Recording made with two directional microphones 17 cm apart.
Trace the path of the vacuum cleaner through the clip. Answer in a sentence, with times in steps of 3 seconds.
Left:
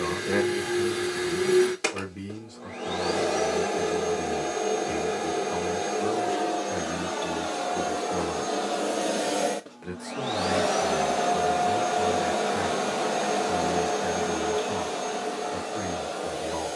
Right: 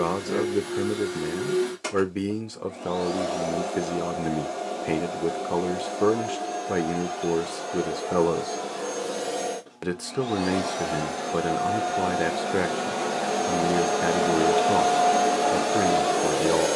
In this clip you hear the vacuum cleaner on the left from 0 s, in the centre from 12 s and on the right from 15 s.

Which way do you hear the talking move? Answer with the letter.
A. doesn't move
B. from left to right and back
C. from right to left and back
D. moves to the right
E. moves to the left
A.